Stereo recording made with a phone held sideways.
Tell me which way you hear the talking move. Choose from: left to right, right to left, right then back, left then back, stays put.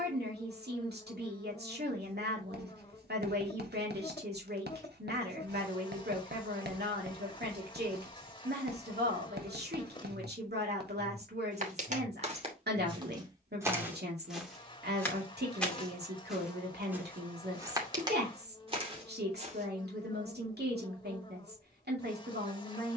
stays put.